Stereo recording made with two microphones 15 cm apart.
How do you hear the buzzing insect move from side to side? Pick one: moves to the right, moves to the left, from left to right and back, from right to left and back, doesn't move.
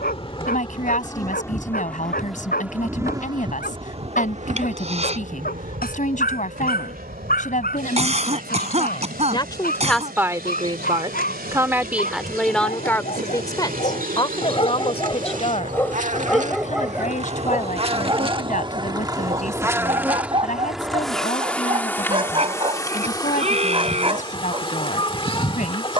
from left to right and back.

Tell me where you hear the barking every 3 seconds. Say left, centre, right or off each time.
left, left, left, left, left, centre, right, right, right.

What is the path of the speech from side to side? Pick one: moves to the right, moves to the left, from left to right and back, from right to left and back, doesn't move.
from left to right and back.